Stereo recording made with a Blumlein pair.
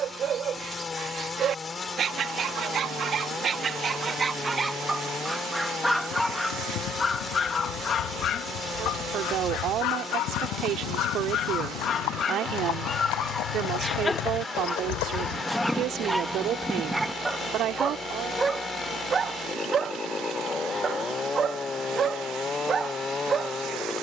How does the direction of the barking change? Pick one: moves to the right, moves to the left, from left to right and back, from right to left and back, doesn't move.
from right to left and back.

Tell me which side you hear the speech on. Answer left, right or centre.
right.